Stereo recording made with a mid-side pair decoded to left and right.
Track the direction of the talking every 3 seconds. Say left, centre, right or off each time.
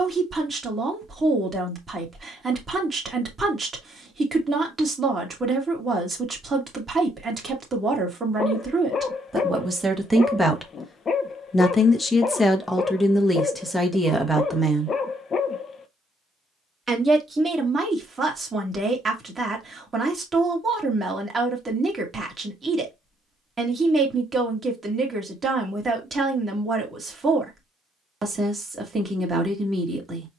right, right, right, centre, centre, right, right, right, right, right.